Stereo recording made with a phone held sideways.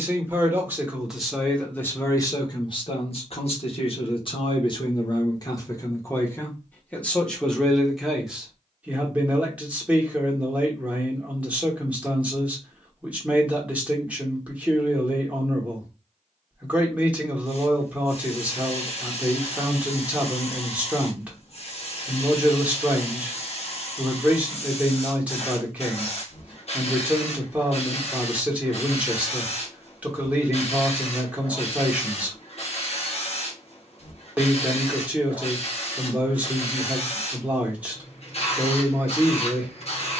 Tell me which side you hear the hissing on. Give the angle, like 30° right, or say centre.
50° left.